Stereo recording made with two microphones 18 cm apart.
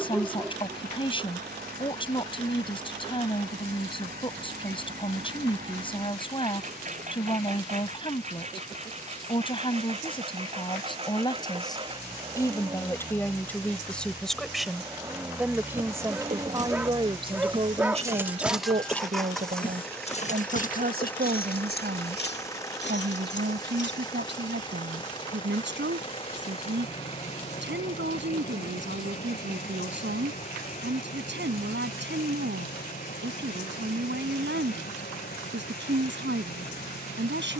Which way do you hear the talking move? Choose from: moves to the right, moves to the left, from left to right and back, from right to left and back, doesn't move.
moves to the right.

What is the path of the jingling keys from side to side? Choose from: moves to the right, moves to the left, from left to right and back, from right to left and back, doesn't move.
moves to the left.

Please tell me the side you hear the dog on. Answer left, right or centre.
centre.